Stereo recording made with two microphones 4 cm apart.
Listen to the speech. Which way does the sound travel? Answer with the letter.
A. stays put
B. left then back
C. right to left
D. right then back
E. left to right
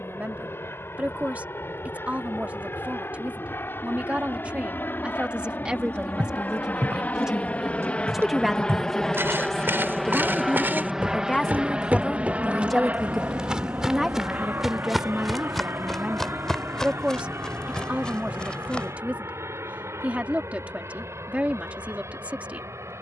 B.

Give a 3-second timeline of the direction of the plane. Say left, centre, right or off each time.
left, left, left, centre, right, right, right, right.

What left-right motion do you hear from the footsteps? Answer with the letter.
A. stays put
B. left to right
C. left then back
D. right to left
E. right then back
D.